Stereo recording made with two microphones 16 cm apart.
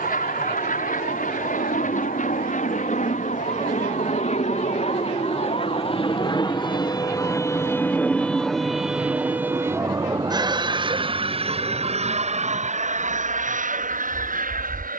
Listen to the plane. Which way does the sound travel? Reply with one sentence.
In this clip you hear the plane go from the left side to the right.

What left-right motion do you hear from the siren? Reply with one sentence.
You can hear the siren go from the left side to the right.